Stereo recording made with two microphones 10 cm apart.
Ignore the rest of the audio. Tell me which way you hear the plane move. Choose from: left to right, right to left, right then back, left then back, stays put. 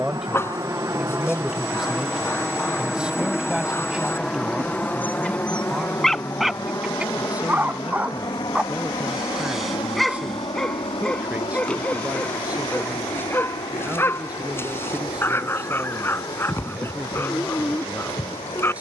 right to left.